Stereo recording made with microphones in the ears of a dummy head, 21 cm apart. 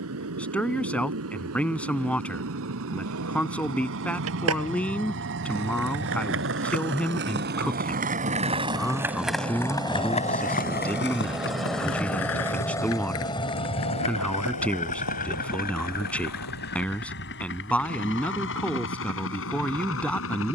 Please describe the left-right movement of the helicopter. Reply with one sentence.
In this clip you hear the helicopter move from right to left.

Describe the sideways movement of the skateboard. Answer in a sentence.
In this clip you hear the skateboard move from right to left.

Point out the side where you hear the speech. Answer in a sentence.
In this clip you hear the speech in the centre.